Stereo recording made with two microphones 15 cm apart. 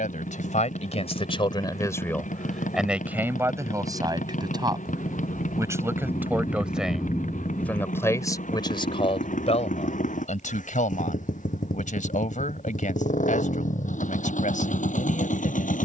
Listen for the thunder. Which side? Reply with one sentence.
In this clip you hear the thunder on the left.